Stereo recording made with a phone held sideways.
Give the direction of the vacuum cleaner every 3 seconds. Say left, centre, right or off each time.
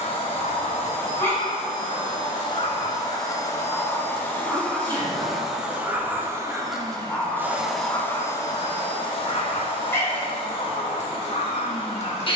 left, centre, centre, left.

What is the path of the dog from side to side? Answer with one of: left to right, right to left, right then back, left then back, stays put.
right then back.